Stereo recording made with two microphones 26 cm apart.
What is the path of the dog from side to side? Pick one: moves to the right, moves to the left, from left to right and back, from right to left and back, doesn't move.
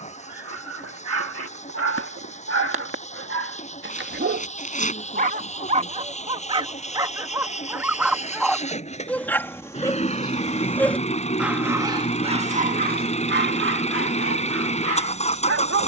from right to left and back.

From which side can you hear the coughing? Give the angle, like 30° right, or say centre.
30° left.